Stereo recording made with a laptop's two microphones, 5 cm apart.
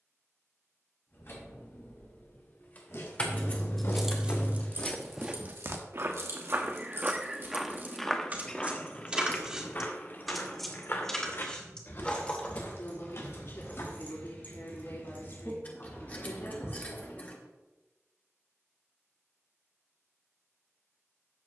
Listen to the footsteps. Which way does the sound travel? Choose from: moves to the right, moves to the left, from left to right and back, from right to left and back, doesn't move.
from left to right and back.